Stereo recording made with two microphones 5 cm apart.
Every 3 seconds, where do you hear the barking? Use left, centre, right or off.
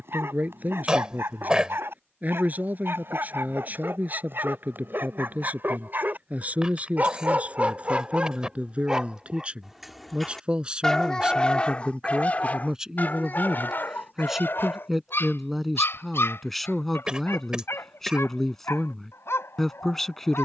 right, right, right, centre, left, left, left.